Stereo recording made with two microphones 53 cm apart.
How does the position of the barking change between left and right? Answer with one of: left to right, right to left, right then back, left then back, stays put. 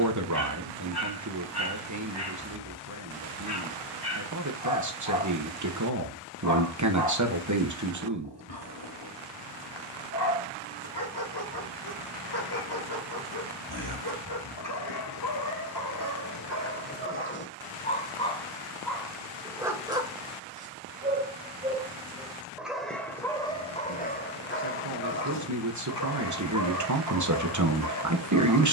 right then back.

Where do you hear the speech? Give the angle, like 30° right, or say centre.
30° right.